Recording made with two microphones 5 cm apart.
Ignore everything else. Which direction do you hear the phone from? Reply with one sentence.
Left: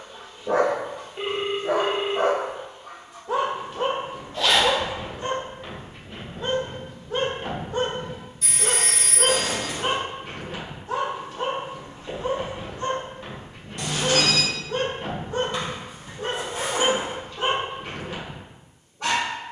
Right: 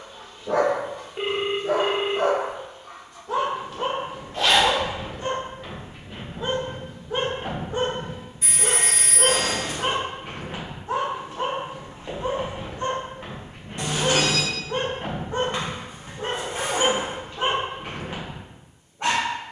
In this clip you hear the phone on the right.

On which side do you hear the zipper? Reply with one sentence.
You can hear the zipper on the right.